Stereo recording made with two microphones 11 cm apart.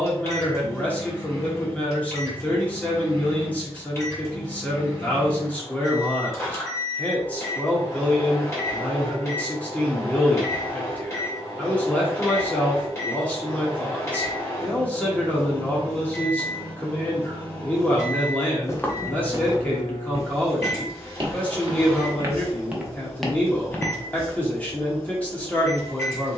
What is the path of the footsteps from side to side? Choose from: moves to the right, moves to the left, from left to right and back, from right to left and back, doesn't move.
from left to right and back.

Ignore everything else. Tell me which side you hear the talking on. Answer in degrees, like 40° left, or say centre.
10° left.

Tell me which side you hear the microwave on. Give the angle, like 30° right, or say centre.
20° left.